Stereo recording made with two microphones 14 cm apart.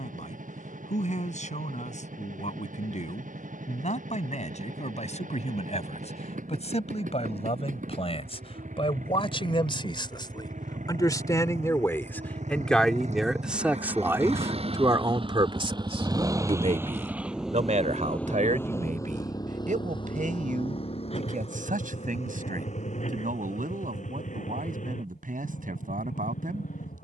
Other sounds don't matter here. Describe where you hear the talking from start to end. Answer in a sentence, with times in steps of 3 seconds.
You can hear the talking on the left from 0 s, in the centre from 12 s and on the right from 15 s.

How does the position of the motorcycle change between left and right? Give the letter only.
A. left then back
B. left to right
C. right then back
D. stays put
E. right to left
E.